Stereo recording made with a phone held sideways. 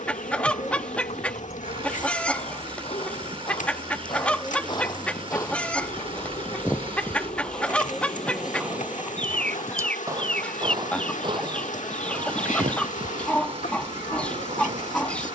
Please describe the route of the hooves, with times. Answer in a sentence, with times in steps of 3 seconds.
You can hear the hooves on the left from 0 s, in the centre from 6 s and on the right from 9 s.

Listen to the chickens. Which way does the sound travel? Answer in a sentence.
You can hear the chickens stay put.